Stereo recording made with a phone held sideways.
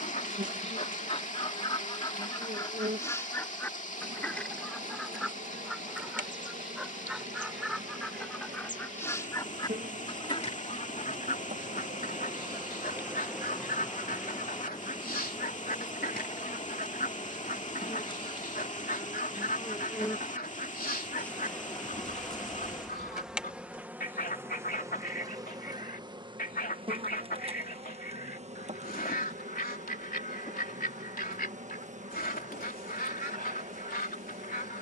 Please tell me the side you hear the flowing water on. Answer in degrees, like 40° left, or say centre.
50° left.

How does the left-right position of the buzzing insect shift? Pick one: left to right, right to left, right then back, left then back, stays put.
left then back.